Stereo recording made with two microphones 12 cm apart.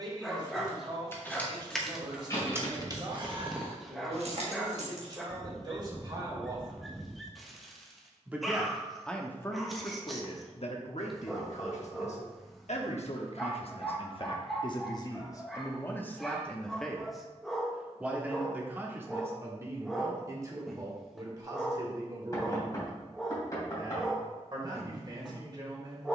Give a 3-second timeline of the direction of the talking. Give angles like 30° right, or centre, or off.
40° right, 40° right, 20° right, 50° left, 60° left, 10° left, 20° right, 40° right, 40° right.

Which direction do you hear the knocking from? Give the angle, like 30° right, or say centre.
30° left.